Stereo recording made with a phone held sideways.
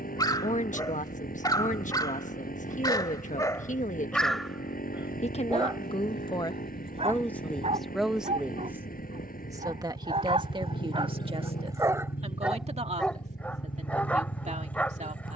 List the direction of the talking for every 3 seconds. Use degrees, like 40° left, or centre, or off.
50° left, 50° left, 10° left, 30° right, 50° right.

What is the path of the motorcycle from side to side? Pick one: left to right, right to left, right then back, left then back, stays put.
stays put.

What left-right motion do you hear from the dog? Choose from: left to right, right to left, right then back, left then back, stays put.
right then back.